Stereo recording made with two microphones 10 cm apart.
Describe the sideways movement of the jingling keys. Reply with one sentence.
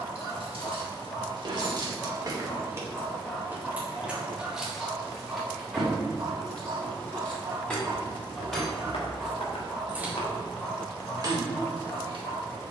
In this clip you hear the jingling keys move from right to left and back again.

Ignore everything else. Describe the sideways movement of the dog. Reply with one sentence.
In this clip you hear the dog move from left to right and back again.